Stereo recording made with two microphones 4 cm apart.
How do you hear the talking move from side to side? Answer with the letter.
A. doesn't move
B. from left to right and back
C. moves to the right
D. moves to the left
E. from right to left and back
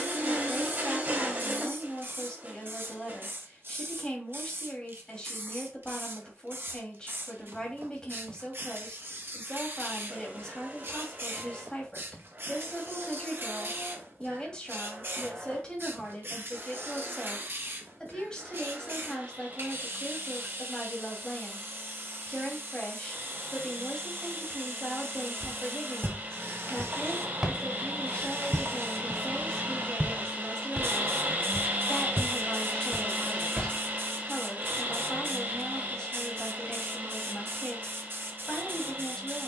A.